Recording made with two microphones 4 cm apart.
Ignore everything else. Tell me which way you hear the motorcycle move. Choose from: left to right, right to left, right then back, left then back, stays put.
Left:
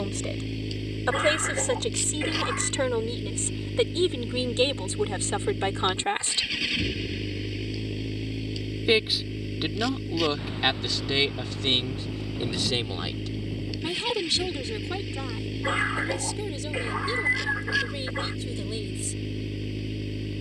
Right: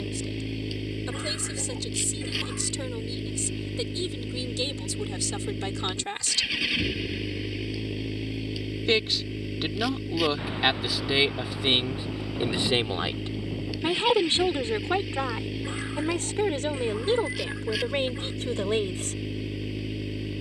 stays put.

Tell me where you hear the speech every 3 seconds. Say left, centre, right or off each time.
left, left, left, centre, right, right, right.